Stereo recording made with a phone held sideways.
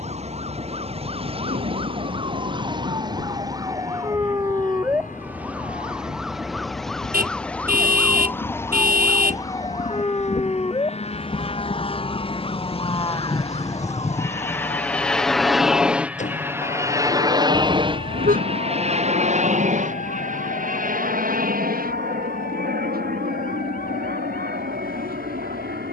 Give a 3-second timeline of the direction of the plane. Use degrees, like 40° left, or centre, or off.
70° left, 70° left, 60° left, 50° left, 20° left, 10° right, 40° right, 60° right, 70° right.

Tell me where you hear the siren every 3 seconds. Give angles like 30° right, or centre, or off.
40° right, 20° right, 10° left, 30° left, 40° left, 50° left, 60° left, 60° left, 60° left.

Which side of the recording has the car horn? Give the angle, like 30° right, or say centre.
70° right.